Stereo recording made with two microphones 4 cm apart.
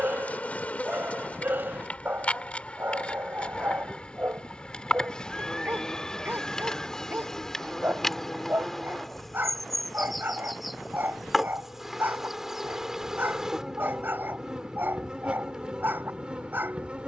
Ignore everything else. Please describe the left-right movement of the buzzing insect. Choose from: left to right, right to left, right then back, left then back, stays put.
left to right.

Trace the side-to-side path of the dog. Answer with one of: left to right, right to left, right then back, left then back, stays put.
stays put.